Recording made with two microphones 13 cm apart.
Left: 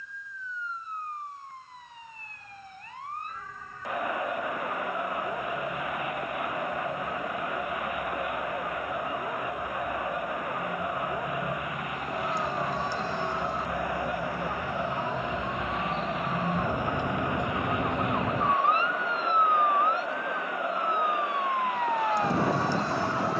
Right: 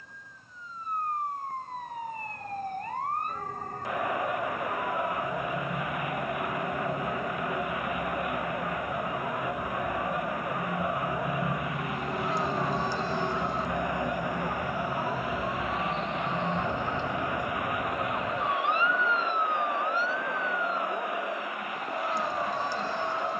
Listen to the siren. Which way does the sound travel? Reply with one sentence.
In this clip you hear the siren move to the left.